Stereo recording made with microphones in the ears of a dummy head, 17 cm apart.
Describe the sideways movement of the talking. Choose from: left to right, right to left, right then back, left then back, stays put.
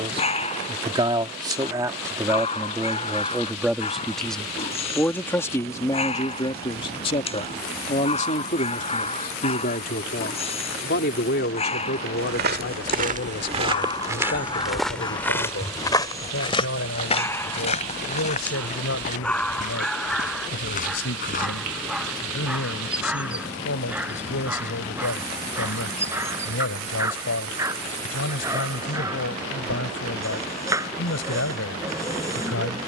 right to left.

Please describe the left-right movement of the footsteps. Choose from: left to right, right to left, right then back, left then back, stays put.
right to left.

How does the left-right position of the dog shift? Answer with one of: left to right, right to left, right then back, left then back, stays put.
left to right.